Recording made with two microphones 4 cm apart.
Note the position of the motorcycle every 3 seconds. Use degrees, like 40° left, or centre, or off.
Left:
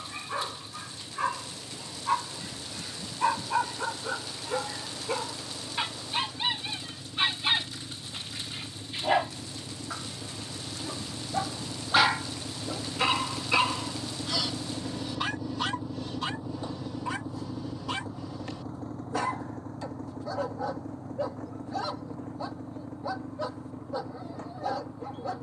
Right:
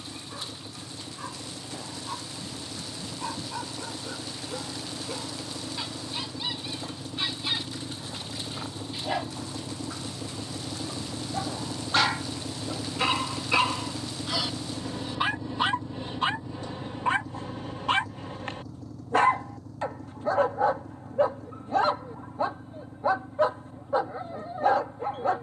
80° right, 70° right, 60° right, 50° right, 20° right, 20° left, 40° left, 50° left, 60° left.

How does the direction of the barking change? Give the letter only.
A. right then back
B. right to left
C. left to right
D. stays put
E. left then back
C.